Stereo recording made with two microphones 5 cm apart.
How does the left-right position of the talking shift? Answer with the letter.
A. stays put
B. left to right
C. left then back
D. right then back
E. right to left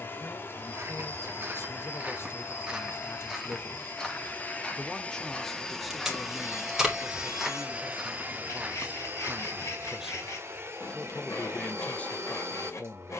D.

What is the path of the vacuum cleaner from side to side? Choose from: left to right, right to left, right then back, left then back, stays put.
left to right.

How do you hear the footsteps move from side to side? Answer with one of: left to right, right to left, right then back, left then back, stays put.
left then back.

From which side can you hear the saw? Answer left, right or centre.
left.